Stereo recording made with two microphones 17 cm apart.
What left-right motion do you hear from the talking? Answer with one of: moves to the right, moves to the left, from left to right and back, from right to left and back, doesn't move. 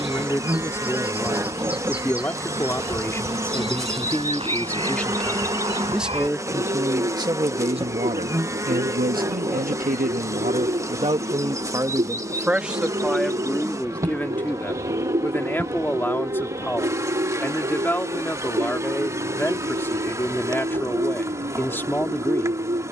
from left to right and back.